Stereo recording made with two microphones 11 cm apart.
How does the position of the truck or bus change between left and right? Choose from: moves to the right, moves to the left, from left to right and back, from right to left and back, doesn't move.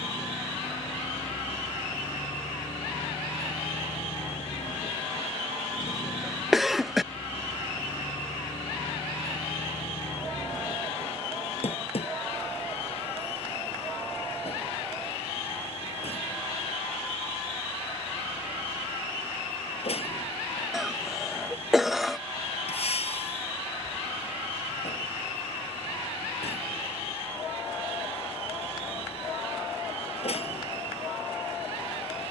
doesn't move.